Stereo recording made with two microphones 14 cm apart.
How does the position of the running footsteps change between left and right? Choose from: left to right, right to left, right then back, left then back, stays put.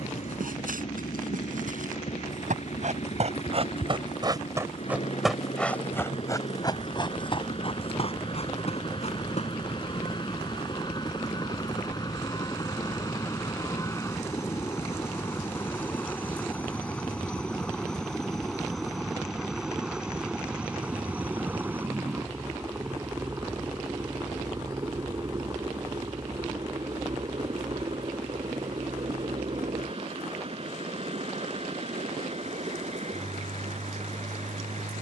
right to left.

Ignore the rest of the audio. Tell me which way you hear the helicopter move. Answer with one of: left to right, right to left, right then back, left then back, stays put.
left to right.